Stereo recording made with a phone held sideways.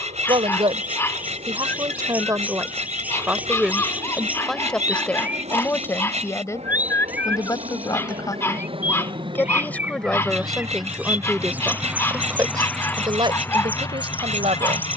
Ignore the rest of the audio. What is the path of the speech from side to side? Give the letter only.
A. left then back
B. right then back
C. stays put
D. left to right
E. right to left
A.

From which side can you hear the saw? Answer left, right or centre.
right.